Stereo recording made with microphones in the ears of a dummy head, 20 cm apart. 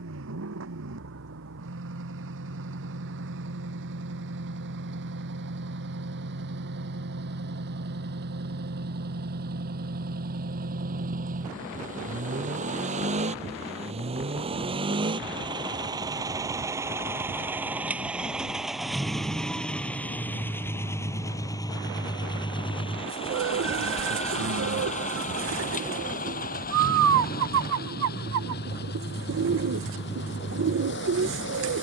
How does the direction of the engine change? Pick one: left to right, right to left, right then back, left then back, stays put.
right to left.